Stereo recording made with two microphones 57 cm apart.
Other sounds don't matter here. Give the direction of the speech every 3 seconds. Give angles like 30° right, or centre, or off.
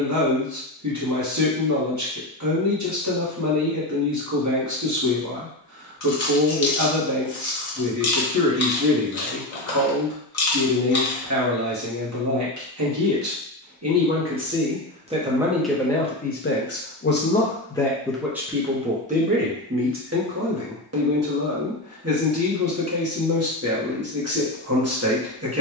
30° right, 30° right, 30° right, 30° right, 30° right, 10° left, 10° right, 30° right, 30° right.